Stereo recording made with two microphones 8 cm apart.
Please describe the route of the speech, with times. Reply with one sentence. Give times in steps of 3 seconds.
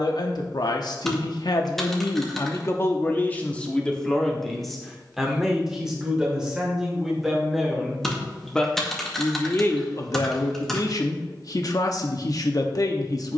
In this clip you hear the speech on the left from 0 s, in the centre from 3 s and on the left from 9 s.